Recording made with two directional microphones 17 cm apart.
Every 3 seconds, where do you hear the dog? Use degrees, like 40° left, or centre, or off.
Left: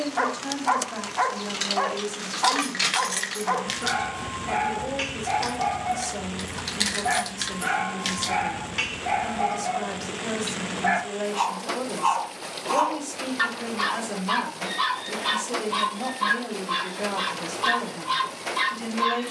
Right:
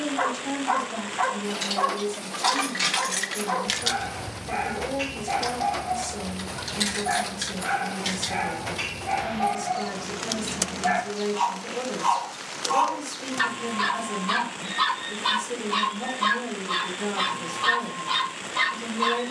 70° left, 70° left, 70° left, 50° left, 10° left, 10° right, 10° right.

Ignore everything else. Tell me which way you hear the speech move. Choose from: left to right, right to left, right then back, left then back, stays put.
stays put.